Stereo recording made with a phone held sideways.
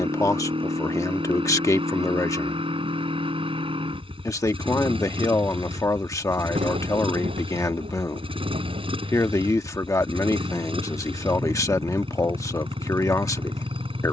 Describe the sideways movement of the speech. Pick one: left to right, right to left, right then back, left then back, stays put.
stays put.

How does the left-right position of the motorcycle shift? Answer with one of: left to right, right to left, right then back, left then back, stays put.
stays put.